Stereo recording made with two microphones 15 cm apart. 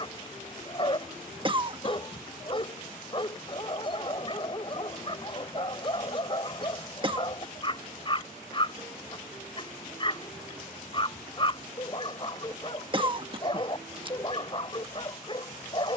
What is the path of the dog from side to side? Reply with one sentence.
In this clip you hear the dog stay put.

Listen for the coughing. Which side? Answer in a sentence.
You can hear the coughing on the right.